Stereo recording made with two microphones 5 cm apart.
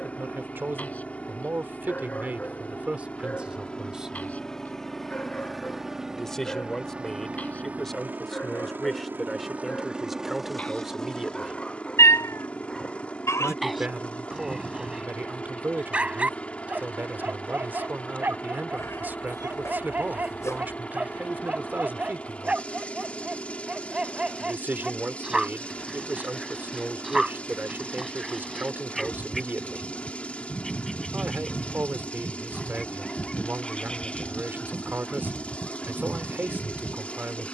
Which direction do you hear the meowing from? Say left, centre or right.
left.